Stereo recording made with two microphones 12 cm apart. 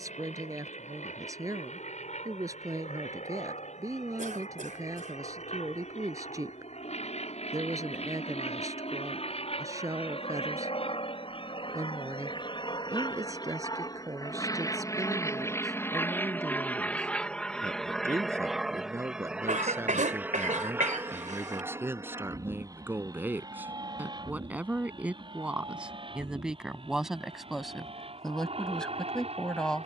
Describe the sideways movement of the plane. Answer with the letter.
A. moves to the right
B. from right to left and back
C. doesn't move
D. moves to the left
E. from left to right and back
A.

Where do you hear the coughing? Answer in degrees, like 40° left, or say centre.
80° right.